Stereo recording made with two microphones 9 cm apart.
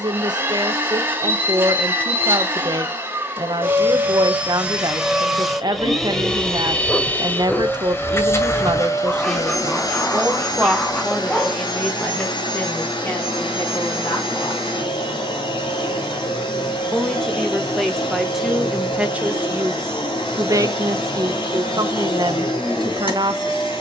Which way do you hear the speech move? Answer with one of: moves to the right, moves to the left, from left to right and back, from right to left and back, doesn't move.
from right to left and back.